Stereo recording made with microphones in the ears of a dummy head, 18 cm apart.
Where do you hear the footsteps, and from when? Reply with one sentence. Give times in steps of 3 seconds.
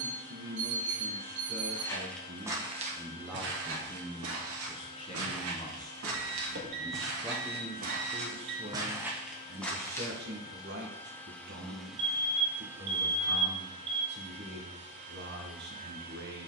In this clip you hear the footsteps in the centre from 0 s, on the right from 3 s, in the centre from 9 s and not at all from 12 s.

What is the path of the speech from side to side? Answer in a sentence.
You can hear the speech go left and come back.